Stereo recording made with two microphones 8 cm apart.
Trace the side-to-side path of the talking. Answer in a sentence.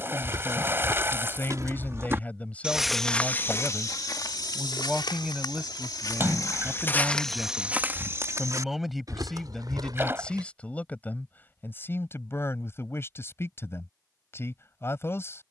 In this clip you hear the talking go right and come back.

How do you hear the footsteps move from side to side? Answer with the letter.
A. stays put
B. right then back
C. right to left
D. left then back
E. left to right
D.